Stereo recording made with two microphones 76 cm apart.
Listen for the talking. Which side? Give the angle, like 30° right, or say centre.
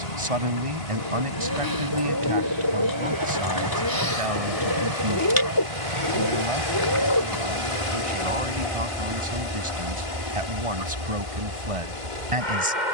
40° right.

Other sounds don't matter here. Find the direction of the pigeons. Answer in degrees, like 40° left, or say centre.
30° left.